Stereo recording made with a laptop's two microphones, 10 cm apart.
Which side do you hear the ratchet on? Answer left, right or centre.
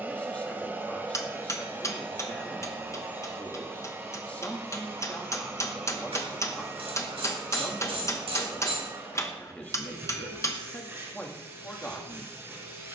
right.